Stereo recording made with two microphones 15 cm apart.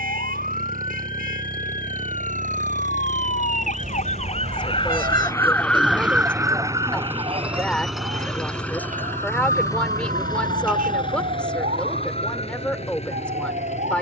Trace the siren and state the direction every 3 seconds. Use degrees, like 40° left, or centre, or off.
70° left, 40° left, 40° right, 60° right, 70° right.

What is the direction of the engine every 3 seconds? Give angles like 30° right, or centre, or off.
70° right, 40° right, 10° right, 30° left, 50° left.